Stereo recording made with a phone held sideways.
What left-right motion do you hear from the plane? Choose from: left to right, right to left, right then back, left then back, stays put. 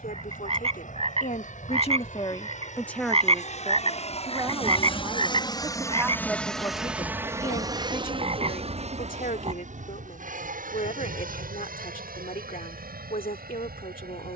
left to right.